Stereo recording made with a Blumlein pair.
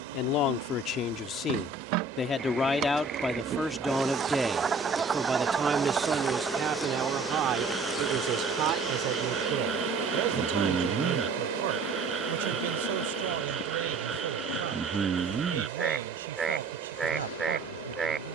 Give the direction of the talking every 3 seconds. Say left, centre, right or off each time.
left, centre, right, right, right, right.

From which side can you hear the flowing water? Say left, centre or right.
right.